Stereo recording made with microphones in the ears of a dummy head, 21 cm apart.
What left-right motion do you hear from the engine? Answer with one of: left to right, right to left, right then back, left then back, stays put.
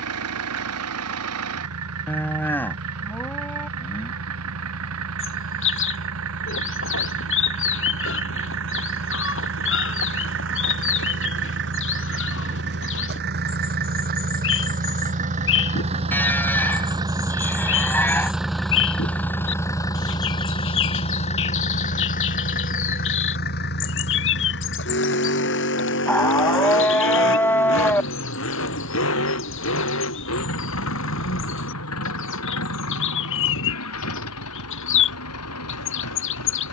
right to left.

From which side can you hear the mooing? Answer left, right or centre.
centre.